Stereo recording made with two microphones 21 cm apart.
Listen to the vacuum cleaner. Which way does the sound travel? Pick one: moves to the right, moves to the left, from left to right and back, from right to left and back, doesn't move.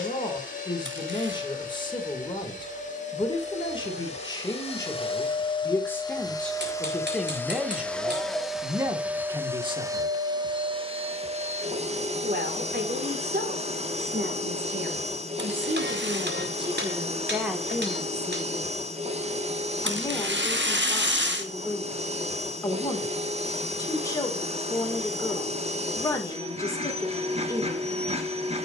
moves to the right.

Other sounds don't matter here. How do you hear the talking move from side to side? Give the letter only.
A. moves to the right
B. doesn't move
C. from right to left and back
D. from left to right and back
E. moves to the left
D.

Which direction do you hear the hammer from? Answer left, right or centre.
right.